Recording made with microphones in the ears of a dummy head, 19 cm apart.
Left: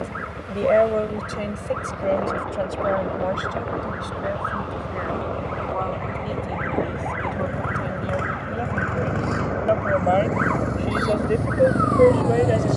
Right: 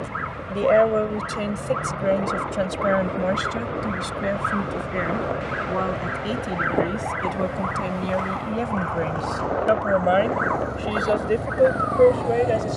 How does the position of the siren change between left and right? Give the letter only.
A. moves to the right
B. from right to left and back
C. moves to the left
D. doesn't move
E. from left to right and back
C.